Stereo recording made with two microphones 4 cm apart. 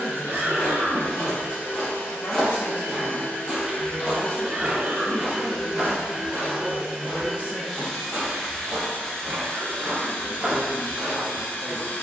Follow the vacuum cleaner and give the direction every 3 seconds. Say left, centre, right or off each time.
left, left, centre, left.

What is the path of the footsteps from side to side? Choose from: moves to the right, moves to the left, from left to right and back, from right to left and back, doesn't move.
from left to right and back.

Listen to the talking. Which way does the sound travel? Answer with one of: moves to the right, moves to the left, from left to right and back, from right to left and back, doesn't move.
moves to the right.